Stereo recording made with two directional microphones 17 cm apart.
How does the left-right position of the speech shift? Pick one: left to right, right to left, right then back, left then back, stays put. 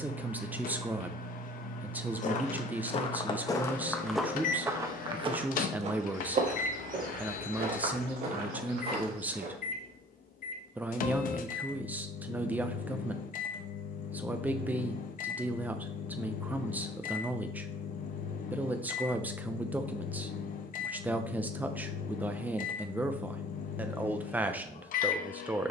stays put.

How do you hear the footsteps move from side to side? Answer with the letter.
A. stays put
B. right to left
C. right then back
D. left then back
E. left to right
E.